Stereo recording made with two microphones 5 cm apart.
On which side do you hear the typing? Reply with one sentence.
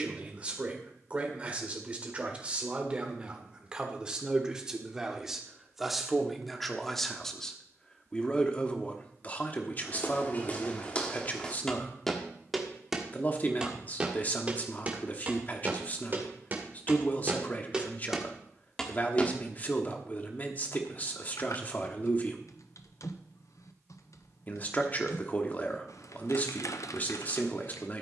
You can hear the typing on the left.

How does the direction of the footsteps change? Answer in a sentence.
You can hear the footsteps move from left to right and back again.